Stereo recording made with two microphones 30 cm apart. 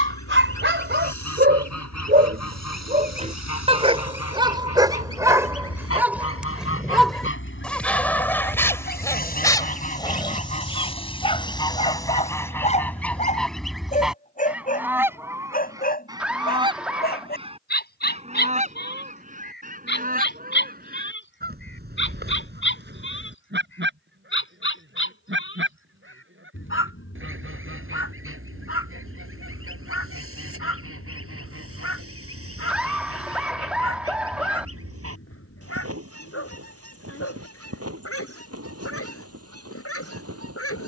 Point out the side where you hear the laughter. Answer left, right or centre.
centre.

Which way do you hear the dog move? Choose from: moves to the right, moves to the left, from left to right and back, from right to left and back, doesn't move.
moves to the left.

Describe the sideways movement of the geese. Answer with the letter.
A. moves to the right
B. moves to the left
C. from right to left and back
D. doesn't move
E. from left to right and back
A.